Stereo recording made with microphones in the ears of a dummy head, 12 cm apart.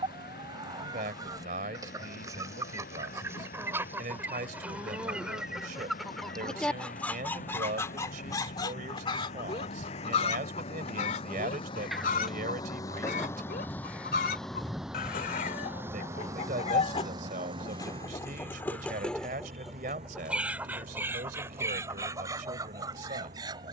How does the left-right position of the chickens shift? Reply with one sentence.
You can hear the chickens move from right to left and back again.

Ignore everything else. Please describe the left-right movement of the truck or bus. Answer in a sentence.
In this clip you hear the truck or bus move to the right.